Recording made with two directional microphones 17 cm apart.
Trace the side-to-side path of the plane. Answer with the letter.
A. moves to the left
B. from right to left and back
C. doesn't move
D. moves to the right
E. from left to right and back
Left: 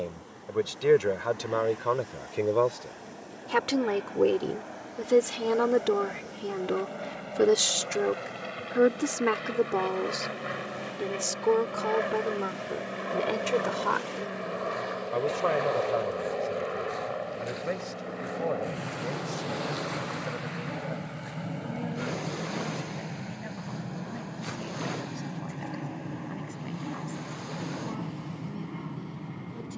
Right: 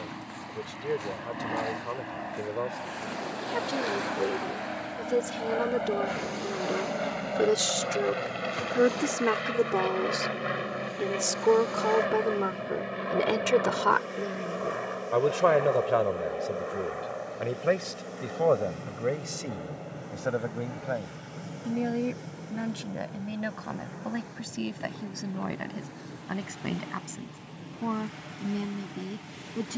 A.